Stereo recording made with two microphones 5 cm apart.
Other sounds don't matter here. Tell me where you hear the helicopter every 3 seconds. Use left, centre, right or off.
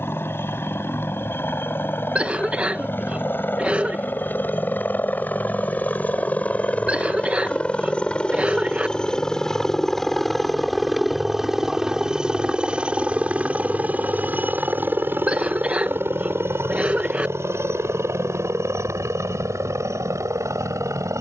left, left, left, centre, right, right, right.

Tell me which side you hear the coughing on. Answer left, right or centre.
right.